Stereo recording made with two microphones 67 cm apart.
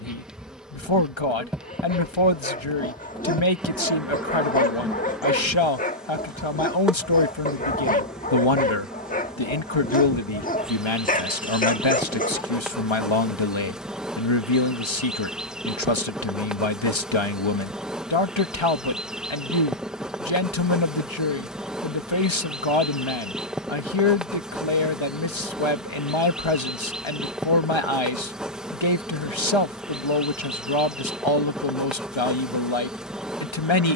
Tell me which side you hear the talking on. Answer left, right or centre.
left.